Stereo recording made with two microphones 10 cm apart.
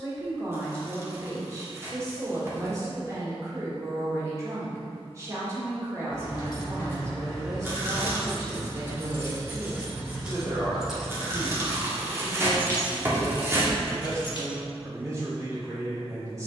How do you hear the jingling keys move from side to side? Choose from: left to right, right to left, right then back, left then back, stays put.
right then back.